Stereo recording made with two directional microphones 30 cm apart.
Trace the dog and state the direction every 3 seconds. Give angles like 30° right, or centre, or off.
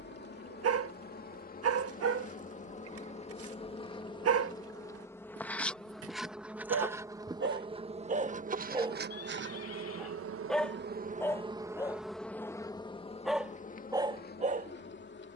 50° right, 50° right, 30° right, centre, 10° right.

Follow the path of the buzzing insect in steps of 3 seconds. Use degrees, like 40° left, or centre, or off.
30° left, 10° left, 10° right, 30° right, 20° left.